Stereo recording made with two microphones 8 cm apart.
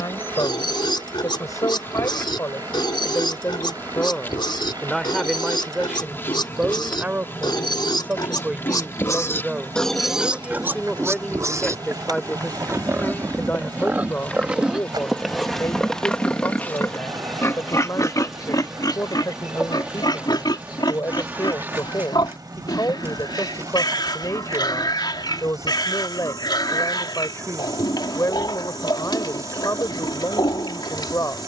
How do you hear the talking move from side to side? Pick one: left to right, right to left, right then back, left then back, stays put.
right then back.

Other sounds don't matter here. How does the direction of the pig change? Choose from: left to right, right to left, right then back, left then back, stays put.
right then back.